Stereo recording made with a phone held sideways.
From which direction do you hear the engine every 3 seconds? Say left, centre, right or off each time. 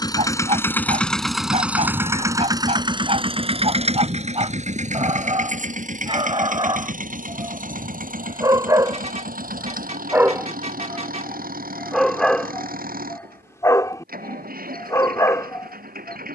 centre, right, right, right, right, right.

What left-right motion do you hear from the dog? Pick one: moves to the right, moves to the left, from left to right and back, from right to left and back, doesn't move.
moves to the left.